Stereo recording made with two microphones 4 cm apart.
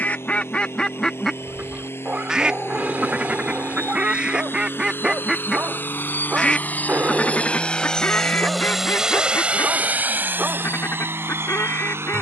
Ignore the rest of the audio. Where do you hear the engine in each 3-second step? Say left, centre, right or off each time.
left, left, left, right.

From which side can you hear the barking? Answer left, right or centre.
right.